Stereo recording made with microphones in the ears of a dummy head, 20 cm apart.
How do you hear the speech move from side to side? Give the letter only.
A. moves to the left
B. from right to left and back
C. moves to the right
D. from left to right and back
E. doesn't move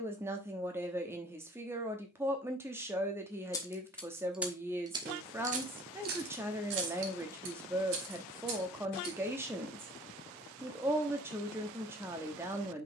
E.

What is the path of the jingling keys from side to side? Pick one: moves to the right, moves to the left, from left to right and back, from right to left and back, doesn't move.
moves to the right.